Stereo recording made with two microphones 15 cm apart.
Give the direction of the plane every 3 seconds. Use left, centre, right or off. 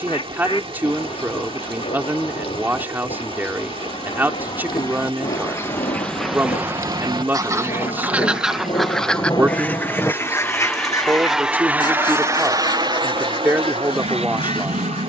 left, left, left, centre, right.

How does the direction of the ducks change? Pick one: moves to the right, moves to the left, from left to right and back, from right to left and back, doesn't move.
from left to right and back.